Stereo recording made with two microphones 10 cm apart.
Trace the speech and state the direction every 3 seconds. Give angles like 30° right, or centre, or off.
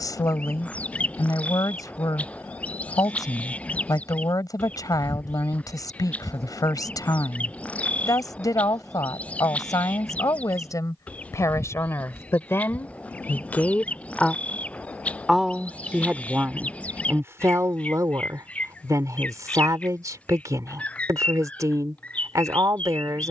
40° left, 40° left, 40° left, 40° left, 20° left, 20° right, 40° right, 40° right.